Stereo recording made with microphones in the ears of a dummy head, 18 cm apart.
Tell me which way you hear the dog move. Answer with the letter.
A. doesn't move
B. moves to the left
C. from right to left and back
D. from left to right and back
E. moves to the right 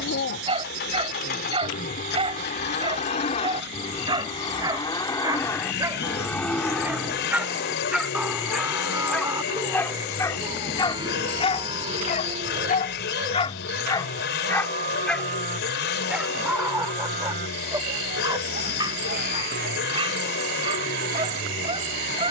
C.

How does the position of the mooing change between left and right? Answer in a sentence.
In this clip you hear the mooing travel towards the right.